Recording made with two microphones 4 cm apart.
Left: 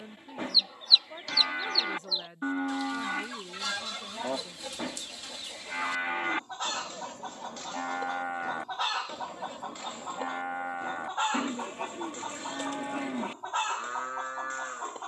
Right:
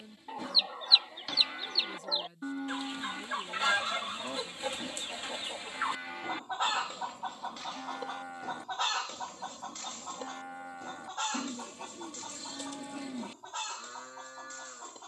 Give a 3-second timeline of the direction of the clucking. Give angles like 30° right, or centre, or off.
30° right, 30° right, 10° right, 20° left, 40° left.